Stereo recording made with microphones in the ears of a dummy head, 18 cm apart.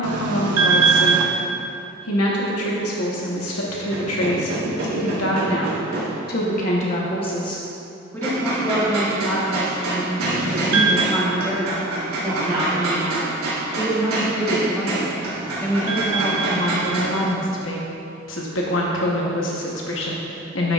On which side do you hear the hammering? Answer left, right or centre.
right.